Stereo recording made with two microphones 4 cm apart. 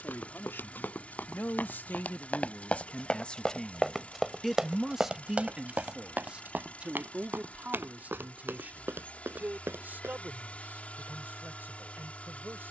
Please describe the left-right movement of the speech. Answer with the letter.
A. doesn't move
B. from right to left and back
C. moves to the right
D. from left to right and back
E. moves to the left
C.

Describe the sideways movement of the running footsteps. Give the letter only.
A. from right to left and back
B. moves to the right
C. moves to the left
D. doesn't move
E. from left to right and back
B.